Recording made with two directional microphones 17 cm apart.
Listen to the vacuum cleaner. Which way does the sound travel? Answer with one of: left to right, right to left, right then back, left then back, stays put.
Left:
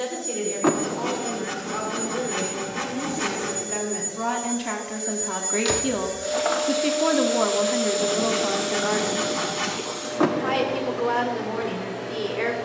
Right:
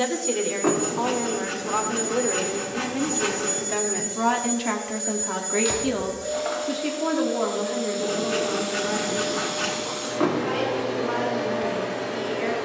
left then back.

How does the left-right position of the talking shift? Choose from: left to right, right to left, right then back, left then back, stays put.
right to left.